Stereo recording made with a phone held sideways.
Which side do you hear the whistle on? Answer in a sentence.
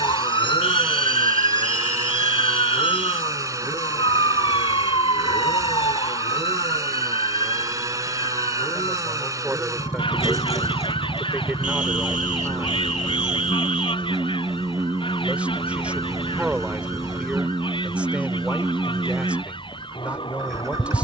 In this clip you hear the whistle on the right.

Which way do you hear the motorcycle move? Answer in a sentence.
You can hear the motorcycle stay put.